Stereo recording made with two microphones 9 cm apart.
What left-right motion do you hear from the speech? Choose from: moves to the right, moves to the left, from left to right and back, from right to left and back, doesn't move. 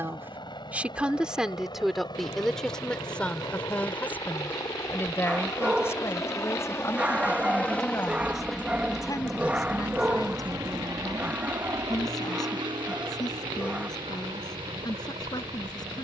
moves to the left.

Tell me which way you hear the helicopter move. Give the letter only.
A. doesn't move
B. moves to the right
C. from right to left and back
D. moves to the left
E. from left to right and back
B.